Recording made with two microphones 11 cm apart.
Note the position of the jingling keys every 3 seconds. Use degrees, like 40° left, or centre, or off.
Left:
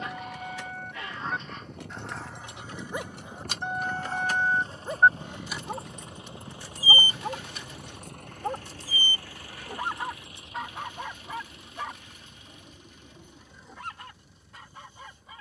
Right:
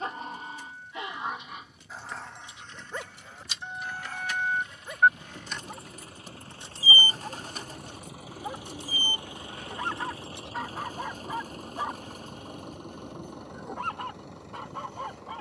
70° left, 30° left, 40° right, 60° right, off.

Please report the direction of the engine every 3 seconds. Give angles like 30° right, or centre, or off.
50° left, 30° left, centre, 30° right, 50° right.